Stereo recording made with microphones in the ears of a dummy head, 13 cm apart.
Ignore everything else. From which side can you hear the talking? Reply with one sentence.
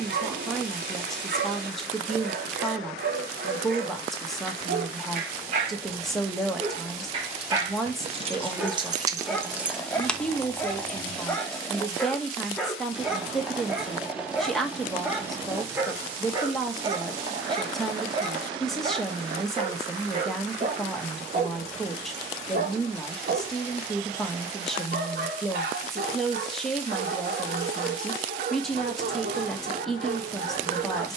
You can hear the talking in the centre.